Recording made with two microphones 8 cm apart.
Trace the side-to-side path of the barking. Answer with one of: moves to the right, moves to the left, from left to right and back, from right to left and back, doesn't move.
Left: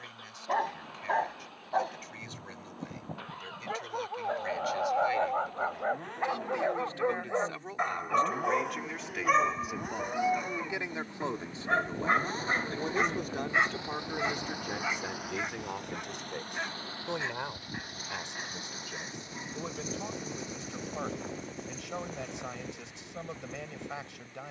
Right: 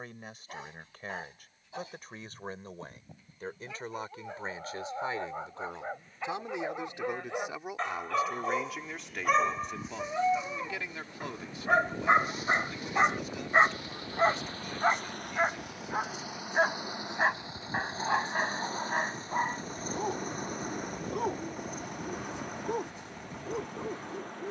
moves to the right.